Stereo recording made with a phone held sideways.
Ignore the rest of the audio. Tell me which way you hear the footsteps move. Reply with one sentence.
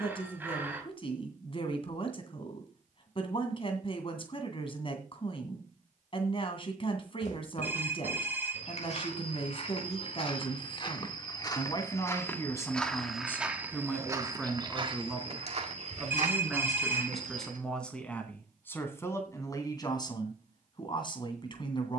You can hear the footsteps move to the right.